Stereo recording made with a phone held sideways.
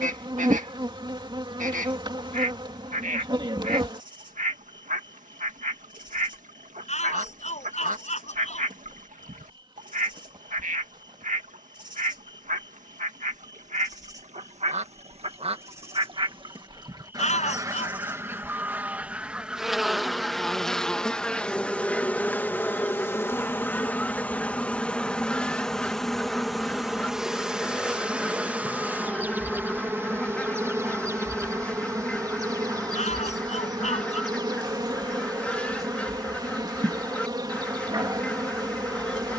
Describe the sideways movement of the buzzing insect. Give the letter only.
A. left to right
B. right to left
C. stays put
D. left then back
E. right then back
D.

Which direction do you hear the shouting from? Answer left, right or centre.
left.